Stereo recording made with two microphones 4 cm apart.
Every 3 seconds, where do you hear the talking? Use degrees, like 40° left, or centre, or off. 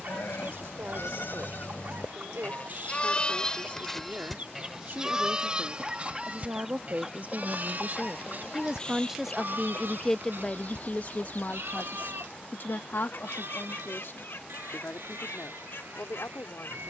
70° right, 60° right, 40° right, 20° left, 60° left, 70° left.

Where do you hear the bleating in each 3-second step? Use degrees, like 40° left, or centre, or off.
50° left, centre, 40° right, 60° right, 60° right, 70° right.